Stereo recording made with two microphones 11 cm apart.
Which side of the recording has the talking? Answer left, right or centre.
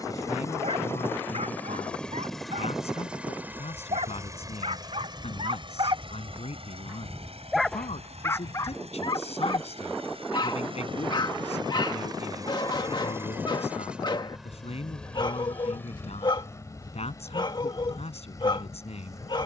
left.